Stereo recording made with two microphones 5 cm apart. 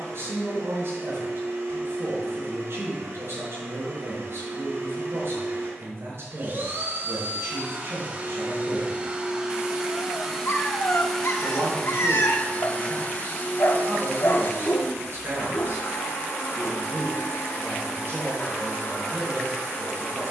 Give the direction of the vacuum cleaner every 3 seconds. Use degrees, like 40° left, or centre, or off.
60° right, 50° right, 40° right, centre, 40° left, 60° left, 80° left.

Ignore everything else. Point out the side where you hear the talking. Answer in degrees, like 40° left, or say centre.
60° right.